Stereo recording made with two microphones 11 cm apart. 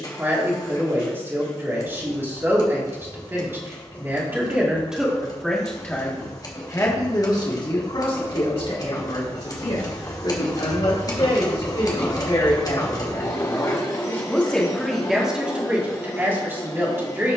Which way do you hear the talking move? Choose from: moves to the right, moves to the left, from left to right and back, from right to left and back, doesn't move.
from right to left and back.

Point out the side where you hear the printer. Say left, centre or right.
left.